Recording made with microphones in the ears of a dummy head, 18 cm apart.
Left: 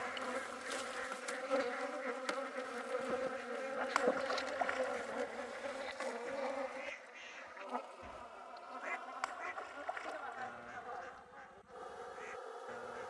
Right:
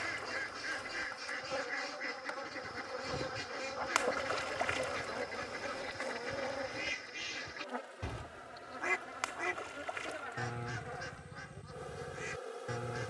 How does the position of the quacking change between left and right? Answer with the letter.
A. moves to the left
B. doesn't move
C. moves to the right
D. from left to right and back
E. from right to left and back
B.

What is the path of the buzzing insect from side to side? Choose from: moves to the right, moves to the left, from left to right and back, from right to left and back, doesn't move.
moves to the right.